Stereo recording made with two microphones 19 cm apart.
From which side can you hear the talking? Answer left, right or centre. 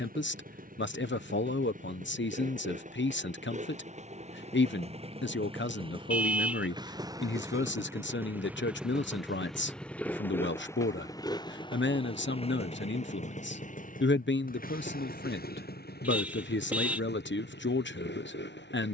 left.